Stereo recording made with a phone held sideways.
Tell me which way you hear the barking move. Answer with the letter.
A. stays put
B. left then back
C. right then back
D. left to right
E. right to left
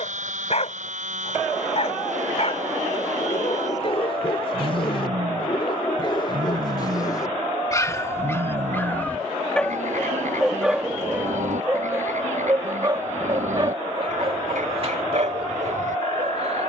D.